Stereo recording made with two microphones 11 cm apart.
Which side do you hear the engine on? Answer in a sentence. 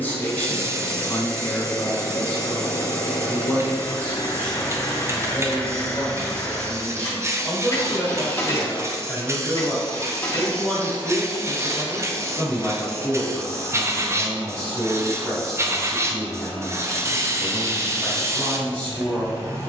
You can hear the engine on the left.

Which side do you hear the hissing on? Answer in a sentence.
In this clip you hear the hissing on the right.